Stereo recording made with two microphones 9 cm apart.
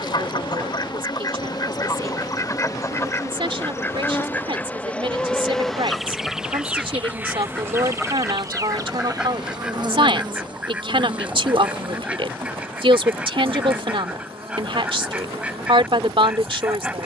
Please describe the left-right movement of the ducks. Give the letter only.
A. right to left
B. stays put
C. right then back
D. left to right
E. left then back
D.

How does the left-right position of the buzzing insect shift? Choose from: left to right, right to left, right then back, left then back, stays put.
left to right.